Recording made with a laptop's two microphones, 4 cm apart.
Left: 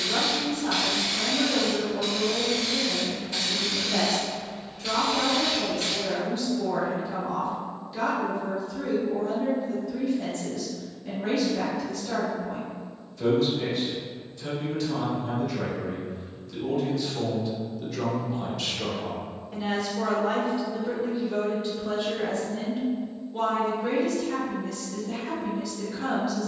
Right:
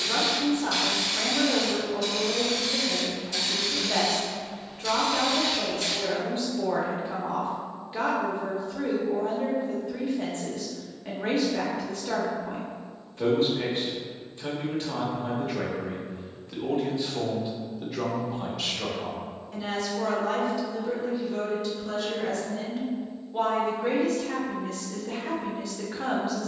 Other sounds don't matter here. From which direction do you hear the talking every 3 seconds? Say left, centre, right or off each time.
right, right, right, right, right, right, centre, centre, right.